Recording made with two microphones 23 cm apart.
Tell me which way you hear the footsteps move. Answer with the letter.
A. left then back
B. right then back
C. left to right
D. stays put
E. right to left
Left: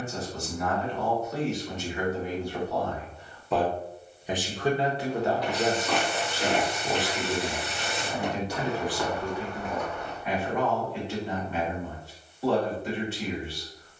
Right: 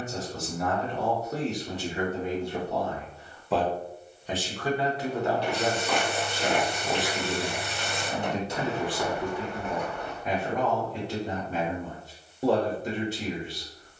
A.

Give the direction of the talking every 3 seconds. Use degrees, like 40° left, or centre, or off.
30° right, 20° left, 10° right, 40° right, 40° right.